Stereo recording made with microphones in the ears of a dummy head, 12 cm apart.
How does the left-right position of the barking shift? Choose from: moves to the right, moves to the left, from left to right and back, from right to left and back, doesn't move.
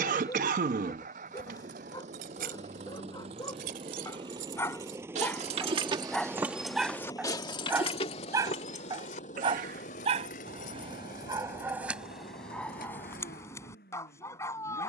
from left to right and back.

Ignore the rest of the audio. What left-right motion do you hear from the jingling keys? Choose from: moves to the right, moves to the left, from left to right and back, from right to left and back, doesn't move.
moves to the left.